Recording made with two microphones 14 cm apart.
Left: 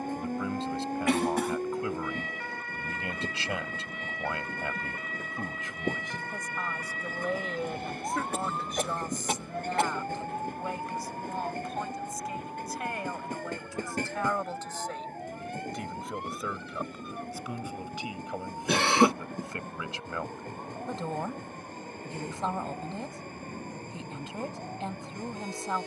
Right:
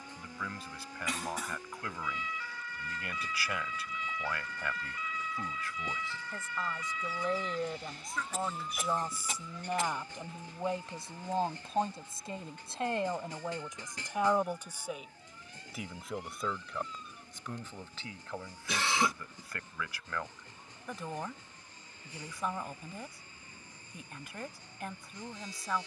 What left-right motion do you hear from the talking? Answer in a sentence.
You can hear the talking move from left to right and back again.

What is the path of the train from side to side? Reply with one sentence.
You can hear the train stay put.